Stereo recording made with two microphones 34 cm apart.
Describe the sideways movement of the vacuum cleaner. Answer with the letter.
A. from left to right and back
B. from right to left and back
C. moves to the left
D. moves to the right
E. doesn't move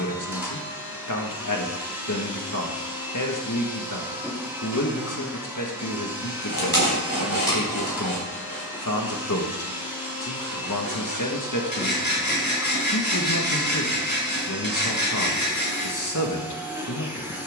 E.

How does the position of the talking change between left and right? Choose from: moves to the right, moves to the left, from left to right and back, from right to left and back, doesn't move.
doesn't move.